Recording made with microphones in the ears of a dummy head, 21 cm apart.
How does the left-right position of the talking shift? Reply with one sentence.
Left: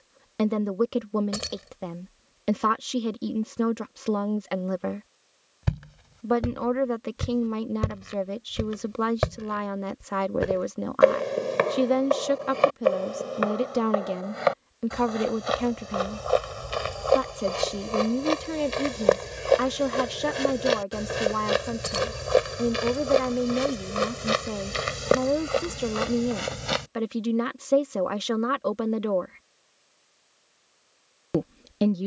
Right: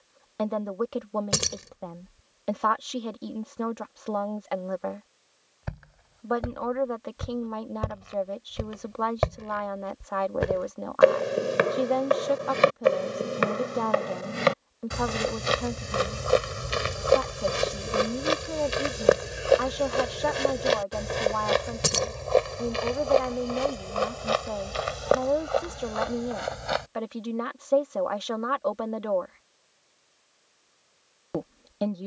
You can hear the talking stay put.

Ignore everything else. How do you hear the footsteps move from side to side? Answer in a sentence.
You can hear the footsteps go right and come back.